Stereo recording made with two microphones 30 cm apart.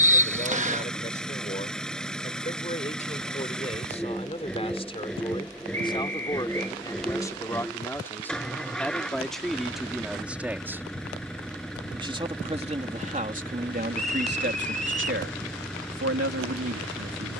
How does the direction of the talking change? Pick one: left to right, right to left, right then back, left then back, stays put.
left to right.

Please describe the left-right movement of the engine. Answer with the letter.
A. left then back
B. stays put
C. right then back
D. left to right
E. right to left
B.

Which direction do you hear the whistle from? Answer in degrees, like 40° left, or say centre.
20° right.